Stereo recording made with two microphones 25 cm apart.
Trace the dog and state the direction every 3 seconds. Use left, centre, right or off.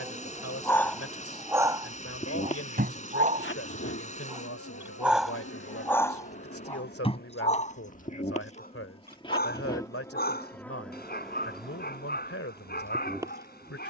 centre, centre, left, left, left.